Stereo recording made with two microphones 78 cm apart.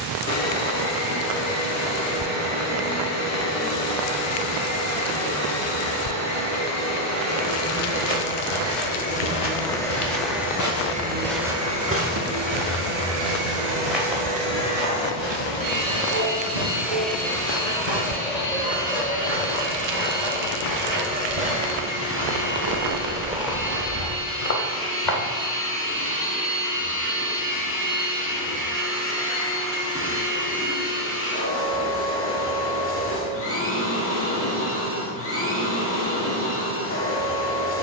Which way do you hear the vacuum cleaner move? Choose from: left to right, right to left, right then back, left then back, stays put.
right then back.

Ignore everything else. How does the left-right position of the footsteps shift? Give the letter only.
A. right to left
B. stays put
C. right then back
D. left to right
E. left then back
C.